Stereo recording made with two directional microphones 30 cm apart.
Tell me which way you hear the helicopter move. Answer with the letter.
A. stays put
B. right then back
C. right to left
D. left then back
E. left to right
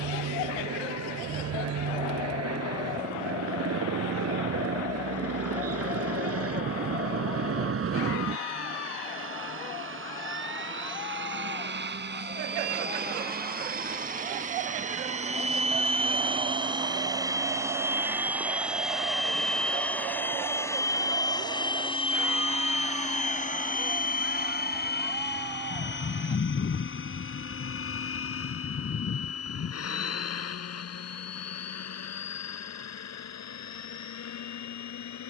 C.